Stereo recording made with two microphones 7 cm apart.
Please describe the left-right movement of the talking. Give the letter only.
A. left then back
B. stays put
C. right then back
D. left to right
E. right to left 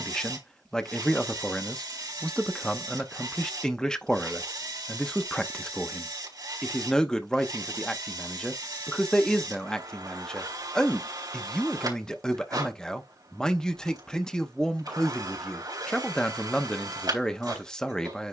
B.